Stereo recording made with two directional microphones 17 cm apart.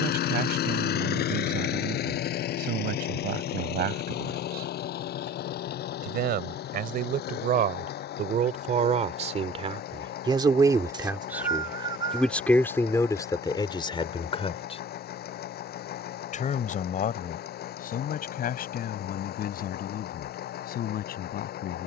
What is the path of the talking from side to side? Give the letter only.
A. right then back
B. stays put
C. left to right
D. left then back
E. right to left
E.